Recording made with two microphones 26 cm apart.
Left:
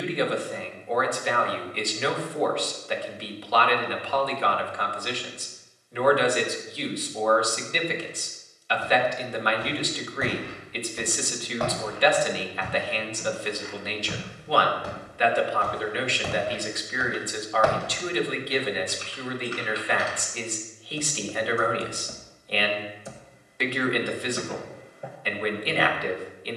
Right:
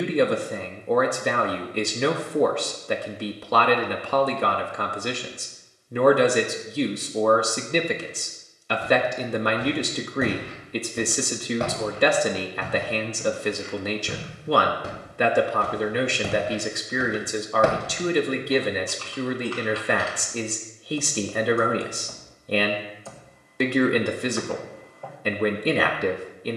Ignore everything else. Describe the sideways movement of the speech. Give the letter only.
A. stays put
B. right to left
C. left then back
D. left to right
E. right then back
A.